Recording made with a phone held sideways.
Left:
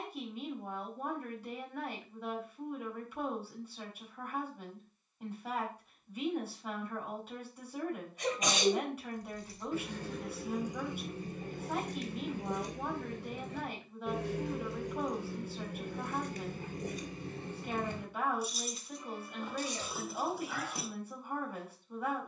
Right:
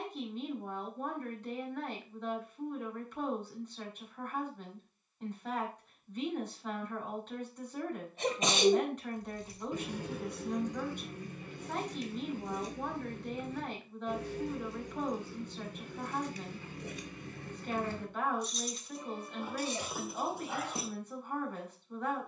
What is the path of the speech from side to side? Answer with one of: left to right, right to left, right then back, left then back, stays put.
stays put.